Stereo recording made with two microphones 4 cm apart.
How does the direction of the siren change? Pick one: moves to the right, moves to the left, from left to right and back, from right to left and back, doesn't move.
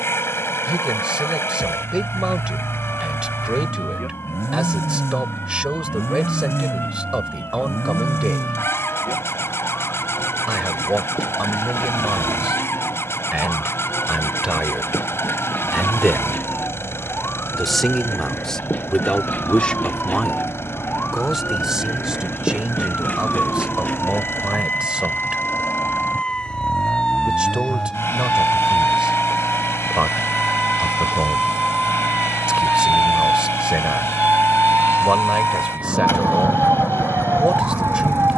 moves to the right.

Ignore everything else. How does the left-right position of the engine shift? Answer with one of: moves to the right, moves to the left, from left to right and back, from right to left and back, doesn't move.
doesn't move.